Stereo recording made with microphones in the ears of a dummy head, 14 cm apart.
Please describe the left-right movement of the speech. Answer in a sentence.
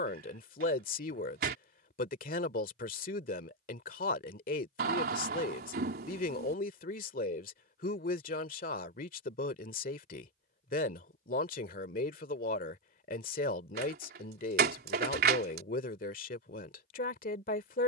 In this clip you hear the speech stay put.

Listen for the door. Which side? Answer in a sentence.
In this clip you hear the door on the right.